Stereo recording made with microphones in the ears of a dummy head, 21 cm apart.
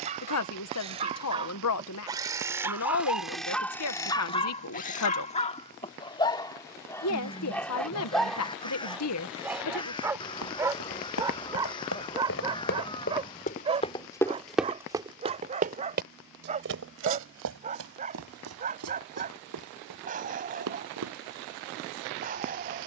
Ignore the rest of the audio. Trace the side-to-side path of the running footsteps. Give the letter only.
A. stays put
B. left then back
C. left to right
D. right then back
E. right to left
C.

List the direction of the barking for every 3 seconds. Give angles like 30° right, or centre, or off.
20° right, 20° left, 10° left, 10° right, 20° right, 30° right, 30° right, 40° right.